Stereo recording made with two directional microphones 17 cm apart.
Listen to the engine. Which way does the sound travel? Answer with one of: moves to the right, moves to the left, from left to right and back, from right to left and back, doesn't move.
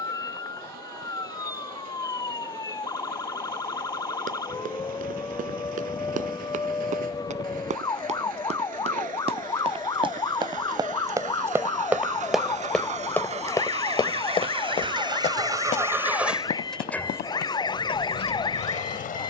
moves to the left.